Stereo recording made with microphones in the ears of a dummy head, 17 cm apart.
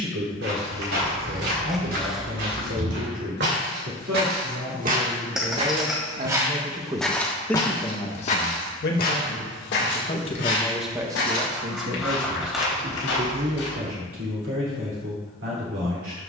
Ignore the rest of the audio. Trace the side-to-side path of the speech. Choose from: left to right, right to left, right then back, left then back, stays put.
left then back.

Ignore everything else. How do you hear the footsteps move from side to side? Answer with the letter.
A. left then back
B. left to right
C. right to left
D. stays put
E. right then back
C.